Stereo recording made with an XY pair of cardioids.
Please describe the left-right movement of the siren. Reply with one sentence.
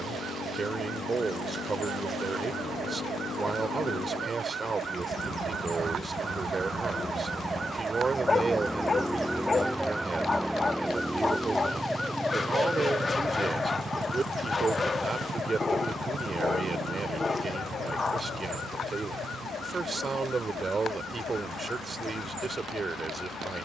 You can hear the siren go from the right side to the left.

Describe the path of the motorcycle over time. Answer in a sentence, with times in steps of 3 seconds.
In this clip you hear the motorcycle on the left from 0 s, in the centre from 9 s and on the right from 12 s.